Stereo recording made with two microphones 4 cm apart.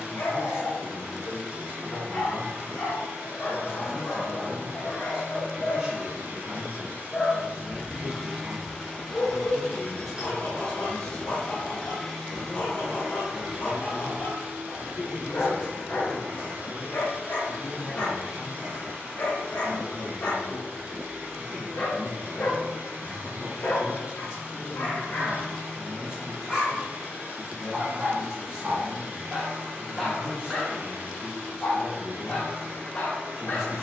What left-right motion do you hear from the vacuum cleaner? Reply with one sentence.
In this clip you hear the vacuum cleaner go left and come back.